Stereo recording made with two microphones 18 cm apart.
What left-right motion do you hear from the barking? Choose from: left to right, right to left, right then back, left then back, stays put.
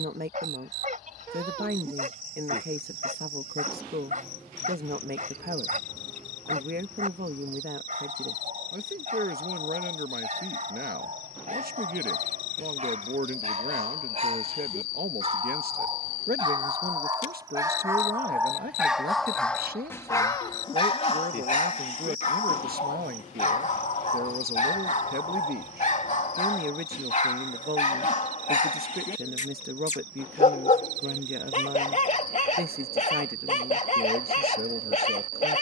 right to left.